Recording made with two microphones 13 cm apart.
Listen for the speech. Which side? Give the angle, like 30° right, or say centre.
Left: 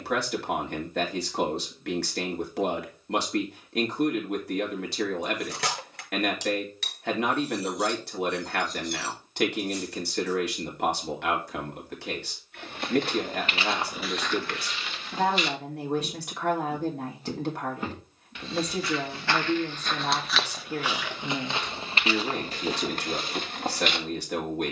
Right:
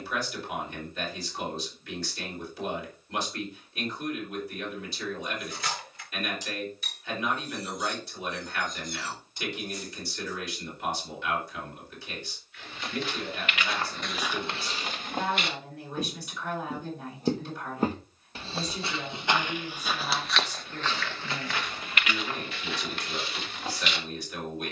70° left.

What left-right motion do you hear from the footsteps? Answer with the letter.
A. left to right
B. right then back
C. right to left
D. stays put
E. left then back
B.